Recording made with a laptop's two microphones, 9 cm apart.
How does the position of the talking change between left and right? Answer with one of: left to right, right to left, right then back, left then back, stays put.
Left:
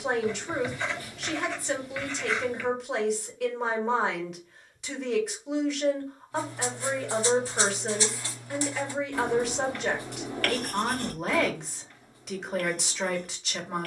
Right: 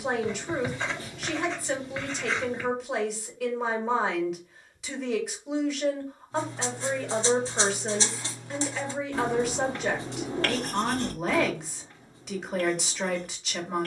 stays put.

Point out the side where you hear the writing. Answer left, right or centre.
right.